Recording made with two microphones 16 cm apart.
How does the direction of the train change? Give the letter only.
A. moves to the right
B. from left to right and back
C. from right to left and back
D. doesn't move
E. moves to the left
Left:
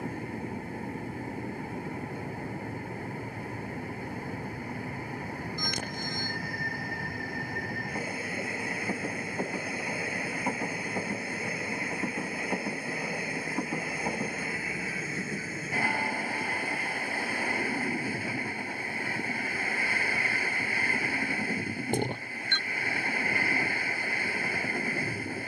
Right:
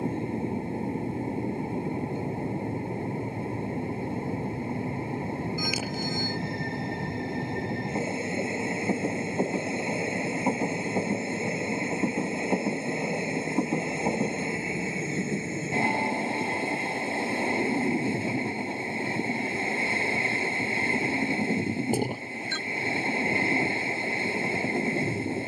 D.